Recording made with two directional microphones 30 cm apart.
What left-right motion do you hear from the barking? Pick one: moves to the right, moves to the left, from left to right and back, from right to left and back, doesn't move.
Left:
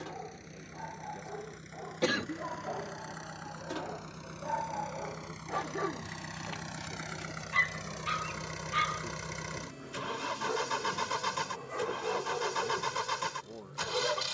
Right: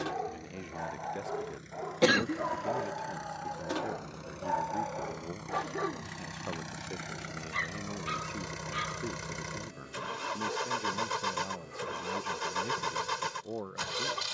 moves to the left.